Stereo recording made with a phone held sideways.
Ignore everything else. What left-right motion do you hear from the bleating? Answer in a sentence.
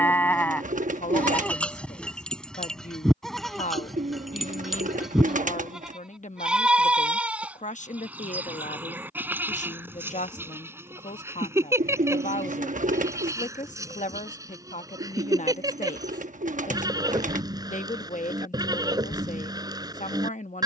You can hear the bleating move to the right.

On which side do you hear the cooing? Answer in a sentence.
You can hear the cooing on the right.